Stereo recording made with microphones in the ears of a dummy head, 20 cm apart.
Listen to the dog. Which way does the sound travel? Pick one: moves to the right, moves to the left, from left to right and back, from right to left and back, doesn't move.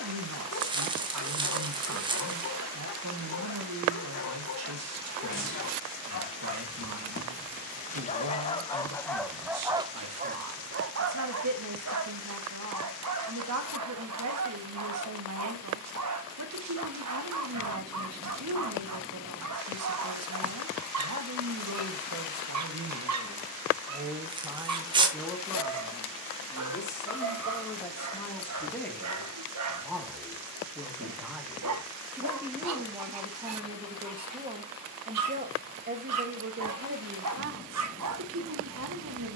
moves to the right.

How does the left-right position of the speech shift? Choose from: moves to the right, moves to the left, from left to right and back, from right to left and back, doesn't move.
from right to left and back.